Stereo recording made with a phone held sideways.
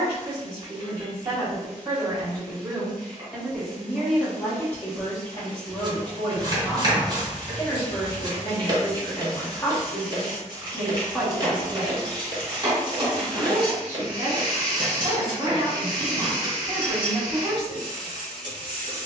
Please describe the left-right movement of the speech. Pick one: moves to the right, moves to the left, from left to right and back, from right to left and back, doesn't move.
from right to left and back.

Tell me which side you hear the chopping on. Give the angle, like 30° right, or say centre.
30° right.